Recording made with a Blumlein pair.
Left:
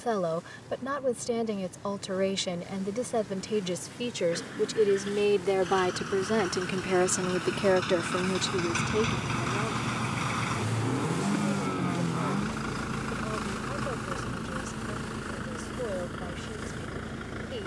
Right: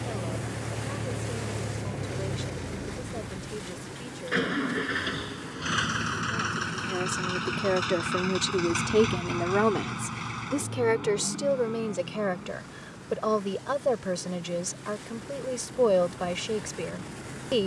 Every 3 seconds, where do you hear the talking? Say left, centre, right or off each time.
left, left, centre, right, right, right.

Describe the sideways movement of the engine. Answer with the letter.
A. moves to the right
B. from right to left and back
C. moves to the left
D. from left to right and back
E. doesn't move
C.